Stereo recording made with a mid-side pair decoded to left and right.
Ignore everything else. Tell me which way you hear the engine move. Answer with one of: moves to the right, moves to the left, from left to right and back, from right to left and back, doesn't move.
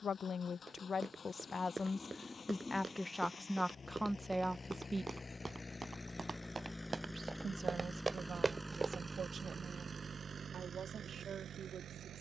moves to the right.